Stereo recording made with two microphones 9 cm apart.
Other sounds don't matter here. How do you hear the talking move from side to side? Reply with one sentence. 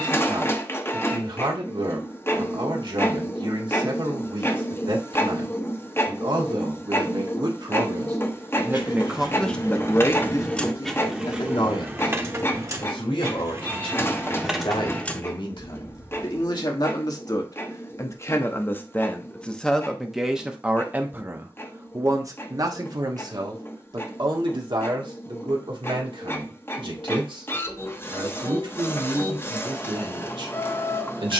In this clip you hear the talking move from right to left and back again.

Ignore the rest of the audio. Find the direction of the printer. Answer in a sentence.
You can hear the printer on the left.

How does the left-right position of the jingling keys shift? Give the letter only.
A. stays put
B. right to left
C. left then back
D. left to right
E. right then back
E.